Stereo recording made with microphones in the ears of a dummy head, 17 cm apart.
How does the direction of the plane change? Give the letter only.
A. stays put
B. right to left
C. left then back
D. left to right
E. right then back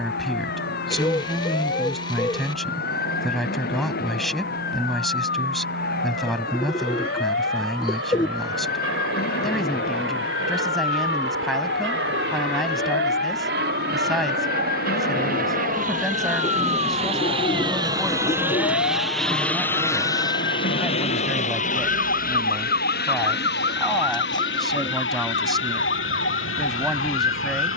B.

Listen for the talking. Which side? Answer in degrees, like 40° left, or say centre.
centre.